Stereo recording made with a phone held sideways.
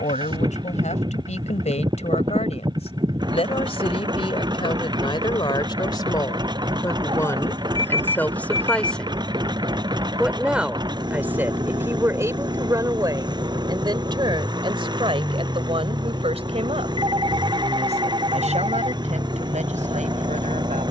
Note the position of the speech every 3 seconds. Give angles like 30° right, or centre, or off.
50° left, 40° left, 20° left, 10° right, 30° right, 40° right, 50° right.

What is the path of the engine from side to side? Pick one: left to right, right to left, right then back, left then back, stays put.
stays put.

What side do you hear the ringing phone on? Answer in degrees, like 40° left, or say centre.
30° right.